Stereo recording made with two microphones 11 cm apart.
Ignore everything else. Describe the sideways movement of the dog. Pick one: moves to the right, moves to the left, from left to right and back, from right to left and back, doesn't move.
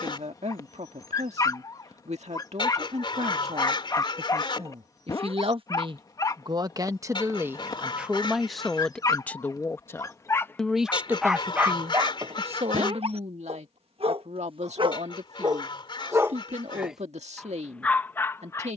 from left to right and back.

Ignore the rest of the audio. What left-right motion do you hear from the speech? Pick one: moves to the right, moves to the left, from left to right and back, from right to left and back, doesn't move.
from right to left and back.